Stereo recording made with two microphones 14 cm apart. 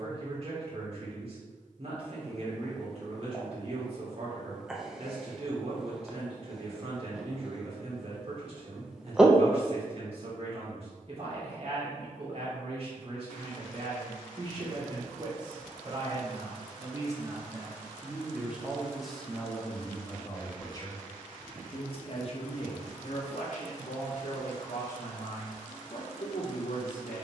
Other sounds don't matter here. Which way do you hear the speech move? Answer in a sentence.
You can hear the speech move to the left.